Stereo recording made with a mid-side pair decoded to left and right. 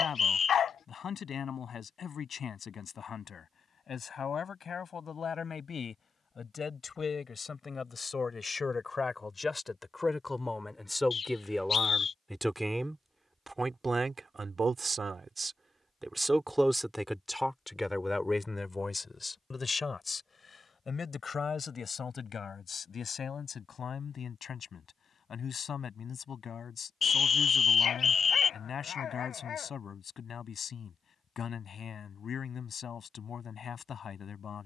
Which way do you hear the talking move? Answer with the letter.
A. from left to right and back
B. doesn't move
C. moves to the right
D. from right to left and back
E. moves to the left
A.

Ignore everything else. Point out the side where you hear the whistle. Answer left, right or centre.
left.